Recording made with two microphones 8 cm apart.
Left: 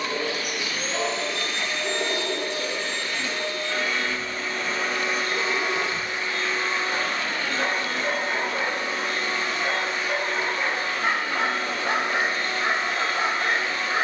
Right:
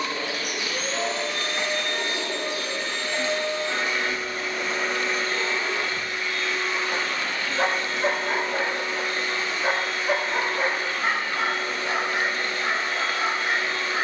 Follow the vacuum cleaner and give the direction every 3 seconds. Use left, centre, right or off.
right, centre, left, left, left.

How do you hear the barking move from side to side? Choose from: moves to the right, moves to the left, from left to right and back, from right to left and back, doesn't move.
from left to right and back.